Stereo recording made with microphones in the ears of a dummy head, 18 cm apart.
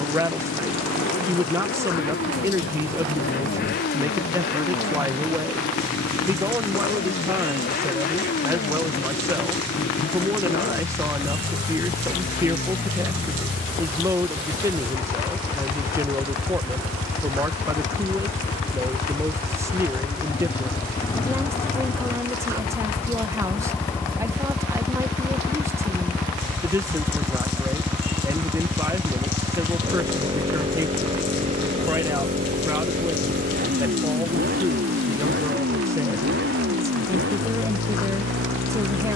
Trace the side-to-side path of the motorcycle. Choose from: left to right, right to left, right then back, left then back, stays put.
left to right.